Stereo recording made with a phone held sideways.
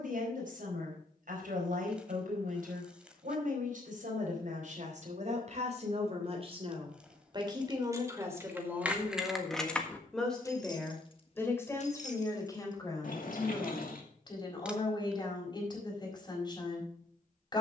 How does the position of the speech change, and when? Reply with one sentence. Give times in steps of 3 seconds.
In this clip you hear the speech on the right from 0 s, in the centre from 9 s and on the left from 12 s.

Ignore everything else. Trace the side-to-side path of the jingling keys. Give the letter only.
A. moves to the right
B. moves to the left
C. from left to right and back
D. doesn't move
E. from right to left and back
B.